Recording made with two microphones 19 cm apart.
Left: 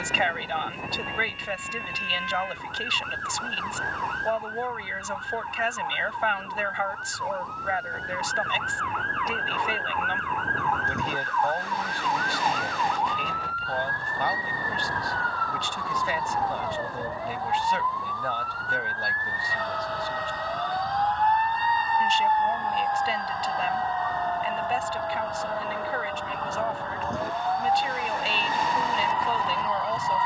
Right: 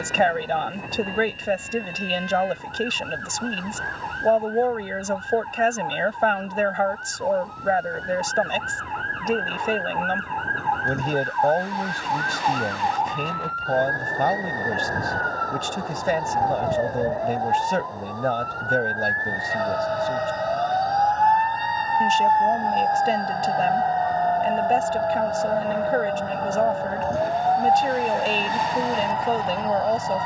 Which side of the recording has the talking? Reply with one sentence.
You can hear the talking on the right.